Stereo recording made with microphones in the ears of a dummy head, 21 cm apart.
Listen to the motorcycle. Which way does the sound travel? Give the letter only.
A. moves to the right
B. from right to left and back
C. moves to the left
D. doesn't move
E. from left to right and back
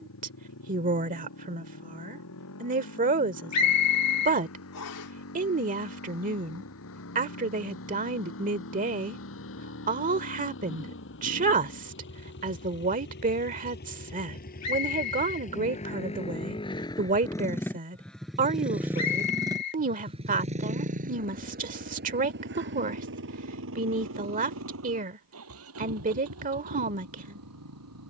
A.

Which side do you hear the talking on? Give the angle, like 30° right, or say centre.
30° right.